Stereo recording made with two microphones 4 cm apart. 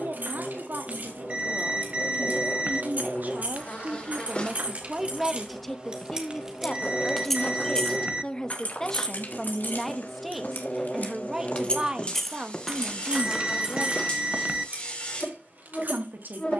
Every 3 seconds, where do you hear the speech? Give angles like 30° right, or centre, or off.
60° right, 20° right, 20° left, 10° right, 30° right, 60° right.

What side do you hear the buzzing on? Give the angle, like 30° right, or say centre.
30° left.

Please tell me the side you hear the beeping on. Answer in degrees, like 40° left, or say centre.
30° right.